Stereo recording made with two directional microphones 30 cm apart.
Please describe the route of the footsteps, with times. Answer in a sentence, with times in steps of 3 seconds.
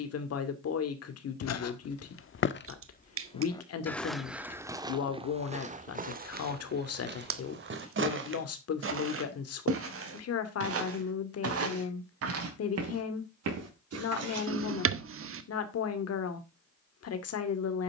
In this clip you hear the footsteps on the left from 0 s, in the centre from 3 s, on the right from 6 s and not at all from 15 s.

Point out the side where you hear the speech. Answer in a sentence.
You can hear the speech on the left.